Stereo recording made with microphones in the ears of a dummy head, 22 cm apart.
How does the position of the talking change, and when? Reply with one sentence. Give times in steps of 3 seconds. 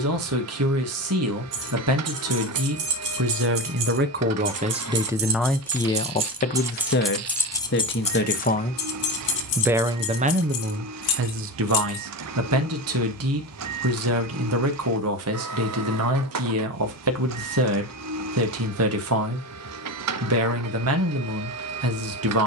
In this clip you hear the talking on the right from 0 s, on the left from 6 s and on the right from 9 s.